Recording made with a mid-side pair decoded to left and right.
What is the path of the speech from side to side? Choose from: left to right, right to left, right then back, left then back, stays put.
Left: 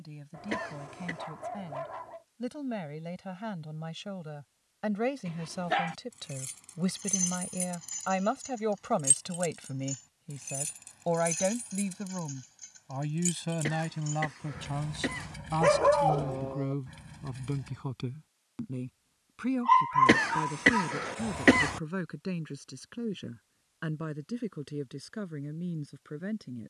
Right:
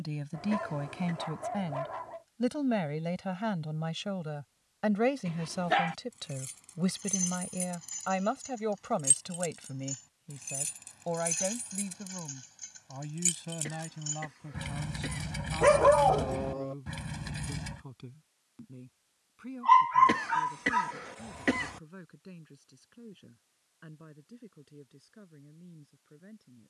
right to left.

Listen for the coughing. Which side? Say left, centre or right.
left.